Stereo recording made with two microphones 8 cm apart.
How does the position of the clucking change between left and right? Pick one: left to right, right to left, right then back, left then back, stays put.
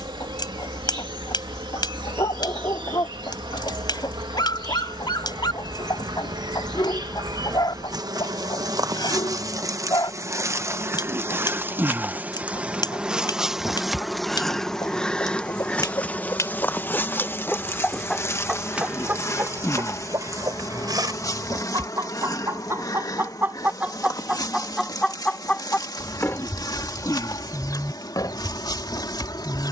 right then back.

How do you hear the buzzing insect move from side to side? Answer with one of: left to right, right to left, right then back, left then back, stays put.
right to left.